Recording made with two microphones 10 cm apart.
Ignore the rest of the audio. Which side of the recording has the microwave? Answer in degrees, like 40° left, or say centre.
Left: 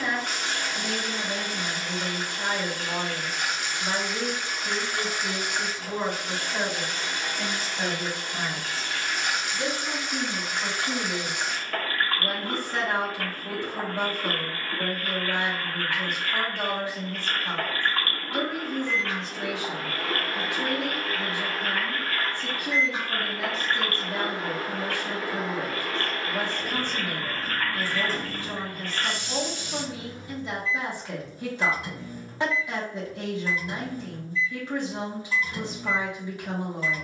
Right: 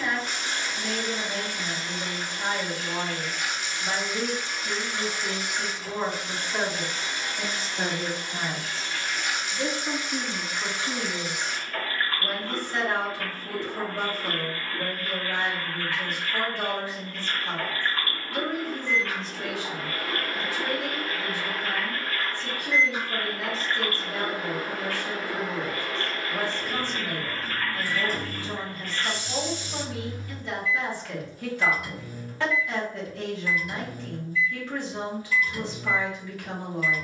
30° left.